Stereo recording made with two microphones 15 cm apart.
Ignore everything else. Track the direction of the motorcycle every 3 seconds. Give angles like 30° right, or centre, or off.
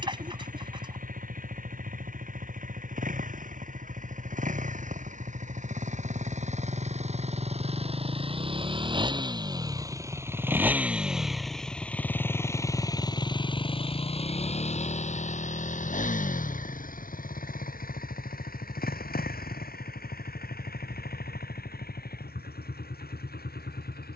60° right, 60° right, 40° right, 10° right, 30° left, 60° left, 70° left, 80° left.